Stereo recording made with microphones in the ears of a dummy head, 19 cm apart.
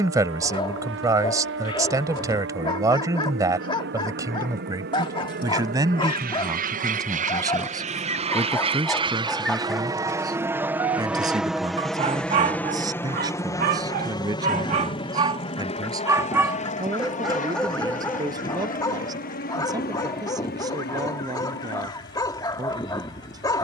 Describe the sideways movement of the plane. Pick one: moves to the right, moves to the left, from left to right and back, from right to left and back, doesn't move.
moves to the left.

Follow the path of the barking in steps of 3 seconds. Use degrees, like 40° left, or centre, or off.
20° left, 20° left, 20° left, 10° right, 40° right, 10° right, 20° left, 20° left.